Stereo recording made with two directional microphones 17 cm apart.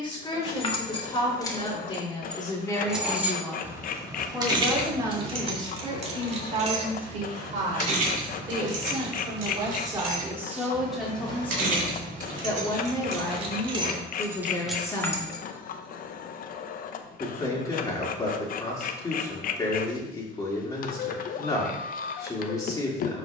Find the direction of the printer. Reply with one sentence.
In this clip you hear the printer on the left.